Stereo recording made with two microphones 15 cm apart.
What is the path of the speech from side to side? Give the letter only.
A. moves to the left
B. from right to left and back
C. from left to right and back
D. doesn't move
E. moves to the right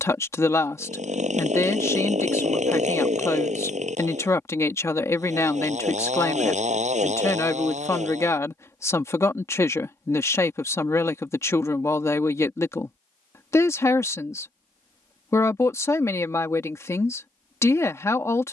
D.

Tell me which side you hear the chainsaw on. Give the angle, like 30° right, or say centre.
50° right.